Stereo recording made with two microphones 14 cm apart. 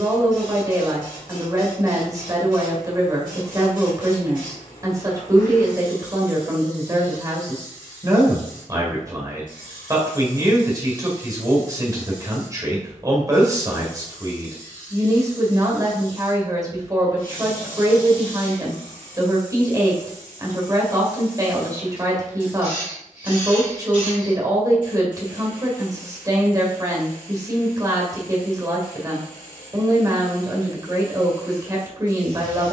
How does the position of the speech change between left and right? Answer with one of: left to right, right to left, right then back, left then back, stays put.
stays put.